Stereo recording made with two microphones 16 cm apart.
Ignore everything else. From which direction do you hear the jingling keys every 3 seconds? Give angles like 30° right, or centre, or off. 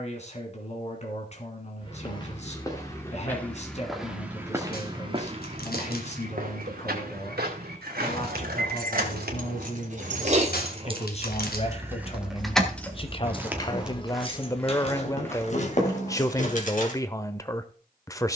off, off, 60° right, 40° right, 20° left, 50° left.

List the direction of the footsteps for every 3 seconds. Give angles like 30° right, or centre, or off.
30° left, 20° right, 70° right, 60° right, 10° right, 20° left.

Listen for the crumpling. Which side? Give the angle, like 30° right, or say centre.
70° left.